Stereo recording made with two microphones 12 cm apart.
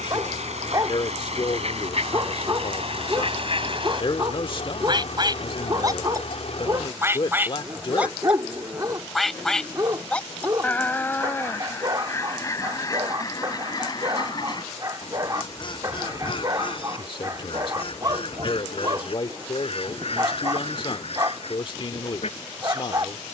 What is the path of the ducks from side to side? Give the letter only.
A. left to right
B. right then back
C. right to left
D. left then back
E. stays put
C.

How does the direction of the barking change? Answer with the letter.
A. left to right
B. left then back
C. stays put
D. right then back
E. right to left
C.